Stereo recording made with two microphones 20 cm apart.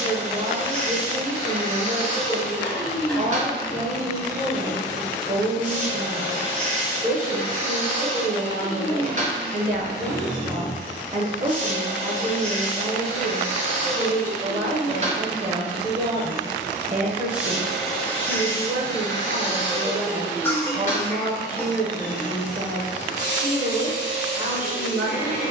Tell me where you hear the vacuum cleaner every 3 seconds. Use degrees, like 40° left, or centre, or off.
40° right, 40° right, 40° right, 40° right, 40° right, 20° right, 30° left, 50° left, 50° left.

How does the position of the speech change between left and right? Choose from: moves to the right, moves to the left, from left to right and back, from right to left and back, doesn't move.
doesn't move.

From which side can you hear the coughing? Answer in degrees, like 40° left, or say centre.
10° left.